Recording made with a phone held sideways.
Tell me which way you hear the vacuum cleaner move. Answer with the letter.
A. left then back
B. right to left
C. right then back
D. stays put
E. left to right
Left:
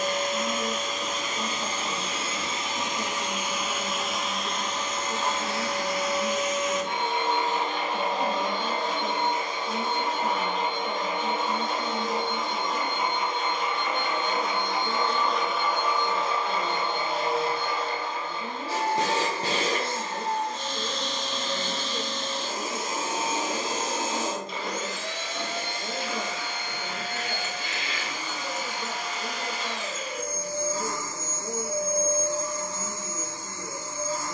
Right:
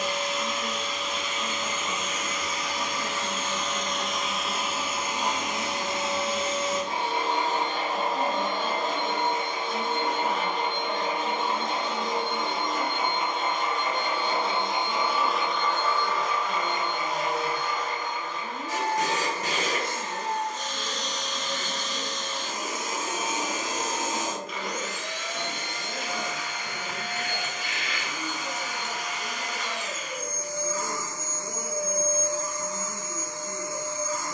C.